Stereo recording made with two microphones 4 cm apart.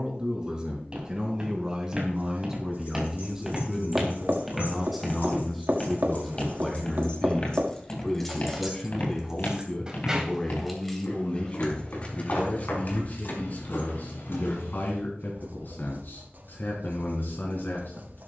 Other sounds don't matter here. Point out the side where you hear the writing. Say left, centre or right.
right.